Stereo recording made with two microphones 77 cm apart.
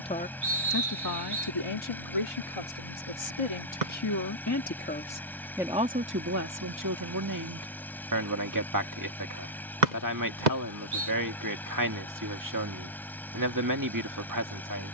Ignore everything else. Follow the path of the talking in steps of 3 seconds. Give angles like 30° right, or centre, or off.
30° left, 20° left, 20° right, 20° right, 20° right.